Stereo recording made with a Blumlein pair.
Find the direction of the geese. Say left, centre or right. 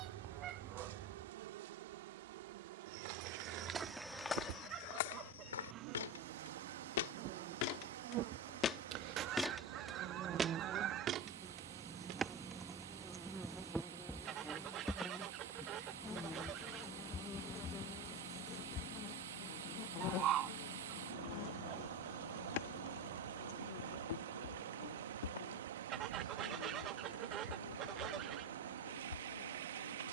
right.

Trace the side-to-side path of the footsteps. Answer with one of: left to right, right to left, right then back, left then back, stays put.
left then back.